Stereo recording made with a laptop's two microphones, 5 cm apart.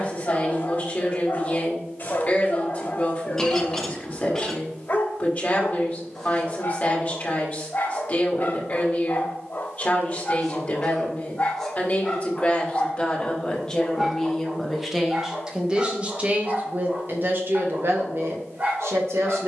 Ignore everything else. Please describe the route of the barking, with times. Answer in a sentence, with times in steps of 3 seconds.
In this clip you hear the barking on the left from 0 s, in the centre from 12 s and on the right from 15 s.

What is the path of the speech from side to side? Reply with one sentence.
In this clip you hear the speech move to the right.